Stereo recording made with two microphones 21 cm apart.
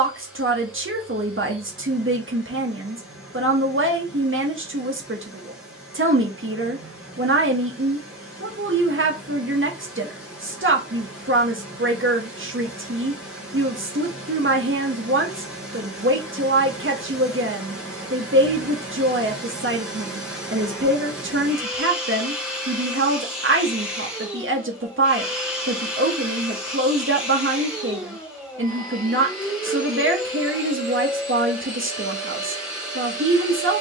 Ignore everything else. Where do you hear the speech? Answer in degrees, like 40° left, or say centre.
70° right.